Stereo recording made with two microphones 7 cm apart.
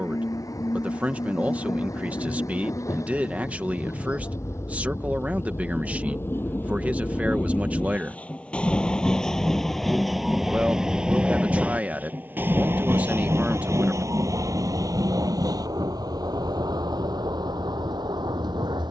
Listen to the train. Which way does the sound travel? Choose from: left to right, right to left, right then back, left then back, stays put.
left to right.